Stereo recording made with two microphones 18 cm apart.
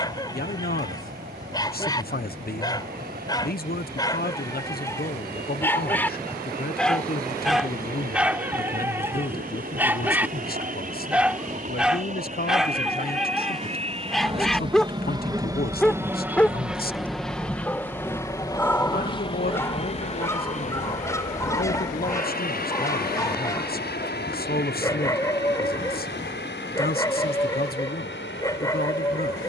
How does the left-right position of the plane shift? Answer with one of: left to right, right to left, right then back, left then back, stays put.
right to left.